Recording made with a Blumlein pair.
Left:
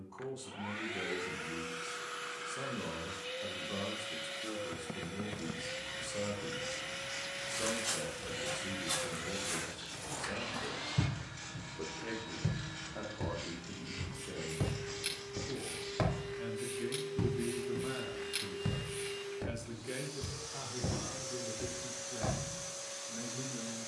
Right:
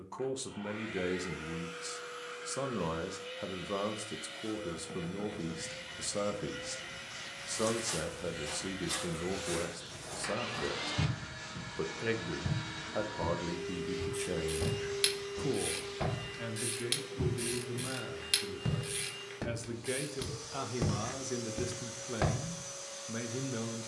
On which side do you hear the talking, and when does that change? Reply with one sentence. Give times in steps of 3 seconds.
In this clip you hear the talking on the right from 0 s, in the centre from 15 s and on the right from 21 s.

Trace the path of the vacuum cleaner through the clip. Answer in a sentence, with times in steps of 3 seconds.
In this clip you hear the vacuum cleaner on the left from 0 s, in the centre from 9 s, on the right from 12 s and in the centre from 15 s.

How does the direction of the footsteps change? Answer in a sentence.
In this clip you hear the footsteps move to the right.